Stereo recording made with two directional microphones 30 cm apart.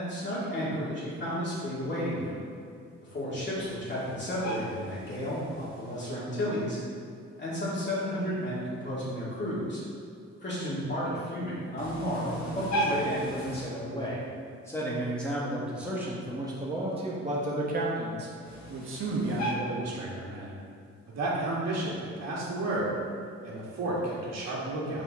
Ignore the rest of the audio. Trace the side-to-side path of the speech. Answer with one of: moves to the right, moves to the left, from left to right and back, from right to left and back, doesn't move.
moves to the right.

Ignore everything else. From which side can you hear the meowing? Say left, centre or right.
left.